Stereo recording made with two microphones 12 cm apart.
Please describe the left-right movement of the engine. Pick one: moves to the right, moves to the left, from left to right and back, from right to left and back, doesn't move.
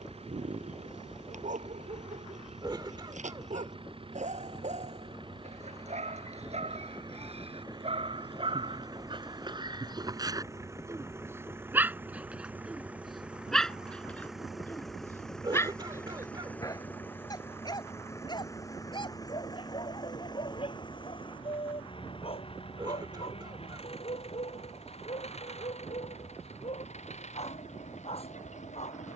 moves to the left.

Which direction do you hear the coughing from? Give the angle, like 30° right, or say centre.
40° right.